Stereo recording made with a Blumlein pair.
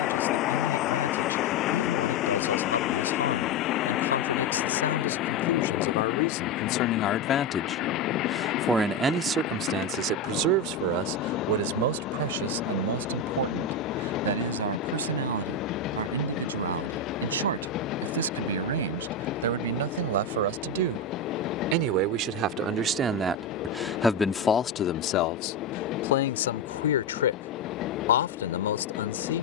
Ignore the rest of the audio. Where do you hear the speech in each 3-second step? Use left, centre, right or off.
left, left, left, right, right, right, right, right, left, left.